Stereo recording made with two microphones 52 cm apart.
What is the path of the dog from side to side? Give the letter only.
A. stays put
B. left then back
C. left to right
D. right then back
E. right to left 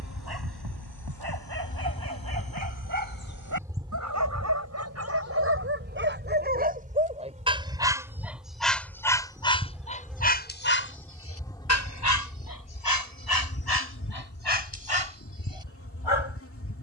E.